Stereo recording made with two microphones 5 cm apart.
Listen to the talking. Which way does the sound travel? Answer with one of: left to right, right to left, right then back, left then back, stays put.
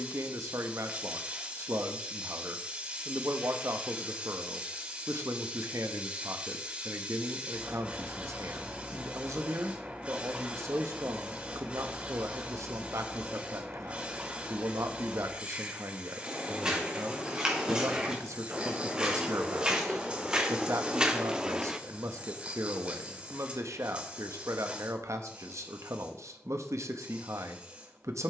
stays put.